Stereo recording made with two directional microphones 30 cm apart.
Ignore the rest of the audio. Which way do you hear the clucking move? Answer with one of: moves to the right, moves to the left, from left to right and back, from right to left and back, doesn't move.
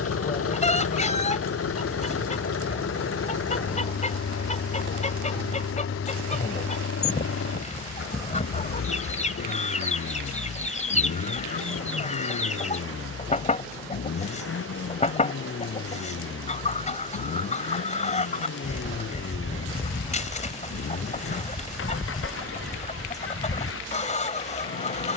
doesn't move.